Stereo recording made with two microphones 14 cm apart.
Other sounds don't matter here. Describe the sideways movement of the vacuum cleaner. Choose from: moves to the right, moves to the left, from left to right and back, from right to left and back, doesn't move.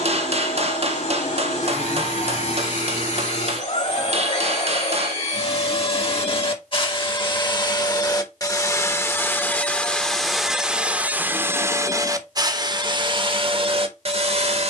moves to the right.